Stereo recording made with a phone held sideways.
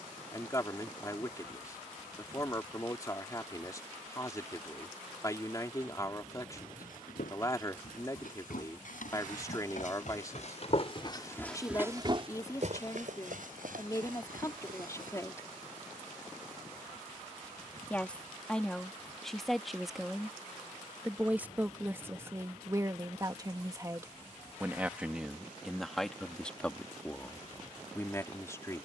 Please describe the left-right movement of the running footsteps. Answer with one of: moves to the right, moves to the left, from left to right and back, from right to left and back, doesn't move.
moves to the right.